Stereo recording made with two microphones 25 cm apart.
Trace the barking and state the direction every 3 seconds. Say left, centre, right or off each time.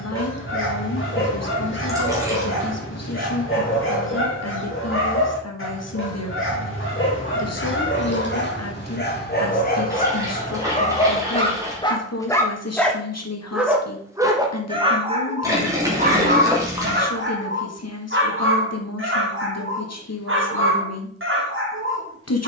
left, left, left, left, centre, right, right, right.